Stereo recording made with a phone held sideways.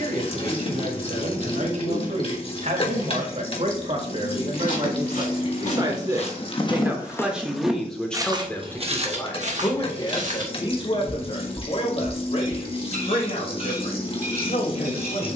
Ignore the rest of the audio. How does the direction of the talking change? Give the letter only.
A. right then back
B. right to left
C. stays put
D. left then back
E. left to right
B.